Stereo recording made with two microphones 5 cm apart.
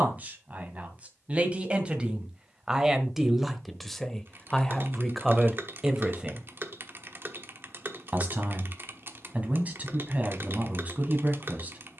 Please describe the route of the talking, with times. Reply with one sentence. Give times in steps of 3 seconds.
In this clip you hear the talking on the right from 0 s, in the centre from 3 s and on the right from 6 s.